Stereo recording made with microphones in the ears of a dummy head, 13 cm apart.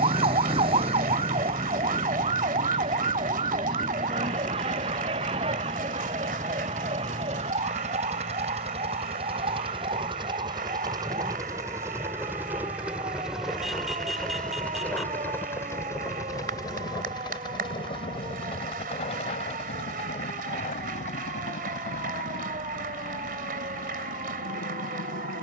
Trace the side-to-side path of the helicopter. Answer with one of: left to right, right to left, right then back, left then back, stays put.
right to left.